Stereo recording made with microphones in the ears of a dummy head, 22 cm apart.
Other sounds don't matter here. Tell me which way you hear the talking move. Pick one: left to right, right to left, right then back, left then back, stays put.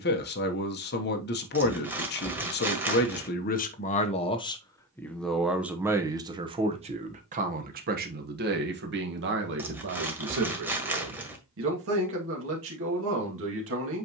left to right.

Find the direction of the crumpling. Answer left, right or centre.
centre.